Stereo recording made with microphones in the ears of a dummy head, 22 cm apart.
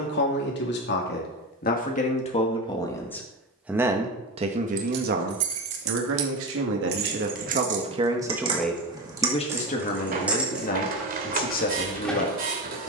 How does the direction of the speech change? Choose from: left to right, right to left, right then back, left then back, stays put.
right then back.